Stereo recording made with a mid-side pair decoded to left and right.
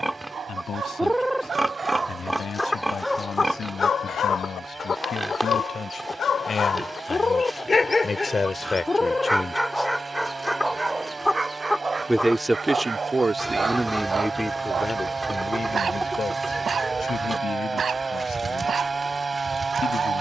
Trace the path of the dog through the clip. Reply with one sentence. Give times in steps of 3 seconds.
In this clip you hear the dog on the right from 0 s, on the left from 3 s, in the centre from 9 s and on the right from 12 s.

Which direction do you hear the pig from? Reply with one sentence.
In this clip you hear the pig in the centre.